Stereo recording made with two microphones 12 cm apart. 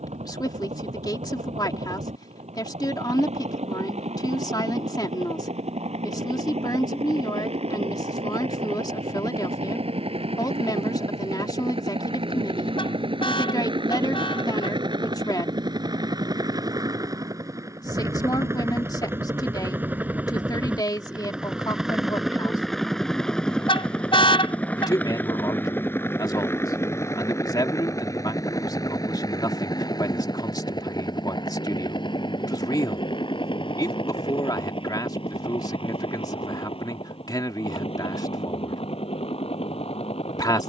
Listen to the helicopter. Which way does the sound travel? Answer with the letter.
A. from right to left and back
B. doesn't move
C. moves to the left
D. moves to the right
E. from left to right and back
C.